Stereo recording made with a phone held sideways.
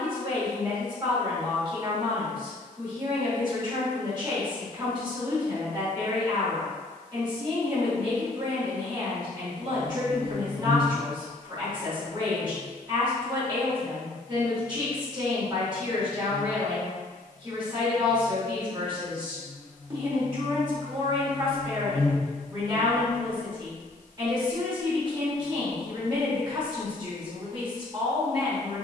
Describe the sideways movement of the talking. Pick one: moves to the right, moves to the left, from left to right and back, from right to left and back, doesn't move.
doesn't move.